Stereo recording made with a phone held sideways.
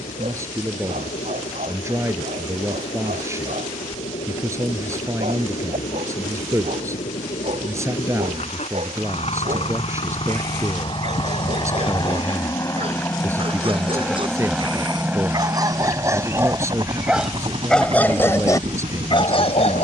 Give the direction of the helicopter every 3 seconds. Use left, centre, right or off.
left, left, left, left, centre, right, right.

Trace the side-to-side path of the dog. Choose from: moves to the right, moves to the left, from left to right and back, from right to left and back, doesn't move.
moves to the left.